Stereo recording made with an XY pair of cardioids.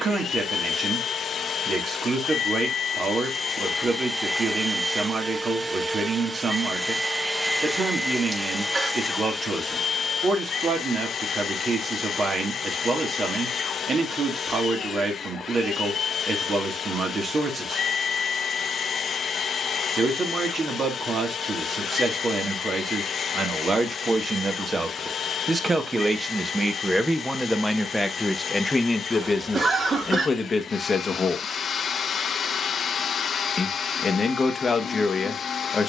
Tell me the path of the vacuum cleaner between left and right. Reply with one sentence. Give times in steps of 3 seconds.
You can hear the vacuum cleaner on the left from 0 s, in the centre from 3 s and on the left from 9 s.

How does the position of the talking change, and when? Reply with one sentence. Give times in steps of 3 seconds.
You can hear the talking on the right from 0 s, in the centre from 27 s and on the left from 30 s.